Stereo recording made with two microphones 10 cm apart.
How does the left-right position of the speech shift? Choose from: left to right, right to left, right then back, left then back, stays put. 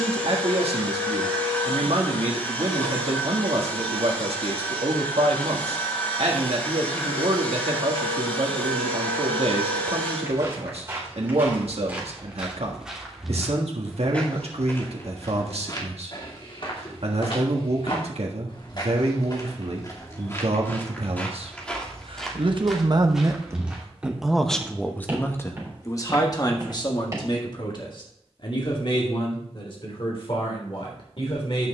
right to left.